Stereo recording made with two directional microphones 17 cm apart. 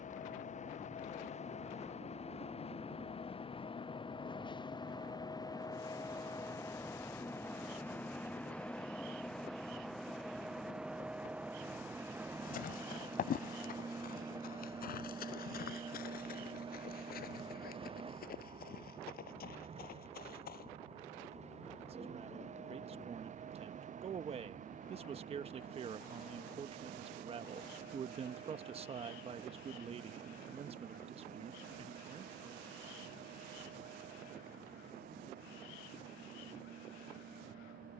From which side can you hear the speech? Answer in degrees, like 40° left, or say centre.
40° right.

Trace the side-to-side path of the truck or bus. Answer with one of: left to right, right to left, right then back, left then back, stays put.
left to right.